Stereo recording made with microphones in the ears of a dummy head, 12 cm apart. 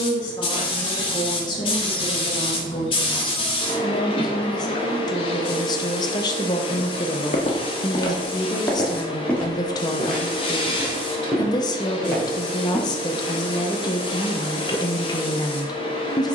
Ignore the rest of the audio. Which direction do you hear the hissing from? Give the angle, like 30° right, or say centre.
40° left.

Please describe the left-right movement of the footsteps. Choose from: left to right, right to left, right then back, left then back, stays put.
left to right.